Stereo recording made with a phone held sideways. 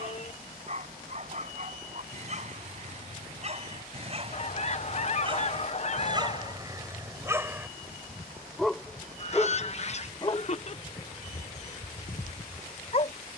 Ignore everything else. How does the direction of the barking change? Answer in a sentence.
You can hear the barking move from right to left.